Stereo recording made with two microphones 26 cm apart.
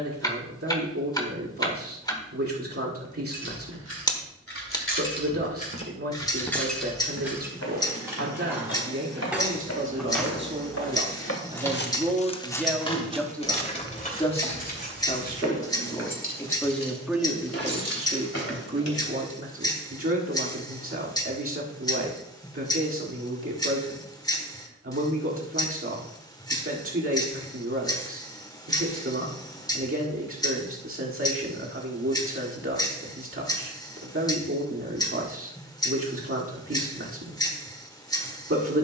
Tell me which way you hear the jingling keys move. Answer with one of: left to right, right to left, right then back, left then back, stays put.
right then back.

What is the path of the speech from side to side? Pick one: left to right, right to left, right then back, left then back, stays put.
left then back.